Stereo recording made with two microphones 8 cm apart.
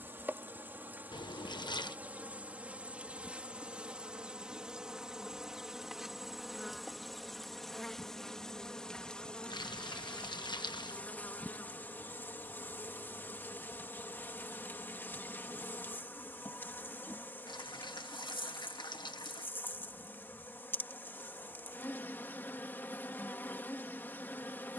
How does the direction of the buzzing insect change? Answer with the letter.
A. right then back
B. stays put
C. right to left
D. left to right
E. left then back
C.